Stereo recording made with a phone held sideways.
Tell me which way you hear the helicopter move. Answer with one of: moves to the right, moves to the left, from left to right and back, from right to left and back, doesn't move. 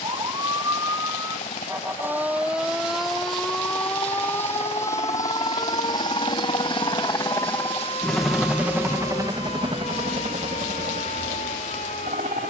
moves to the right.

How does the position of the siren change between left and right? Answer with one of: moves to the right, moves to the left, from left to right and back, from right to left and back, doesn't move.
moves to the left.